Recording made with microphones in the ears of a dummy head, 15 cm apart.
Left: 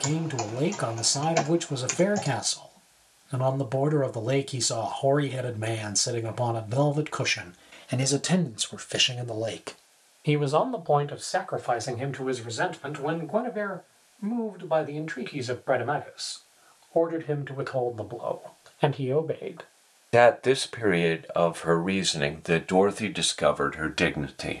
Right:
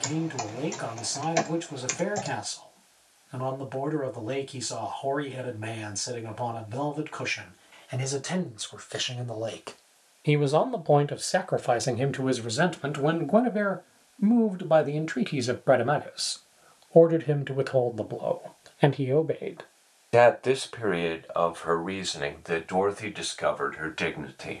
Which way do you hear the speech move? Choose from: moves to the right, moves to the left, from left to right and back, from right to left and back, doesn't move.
from left to right and back.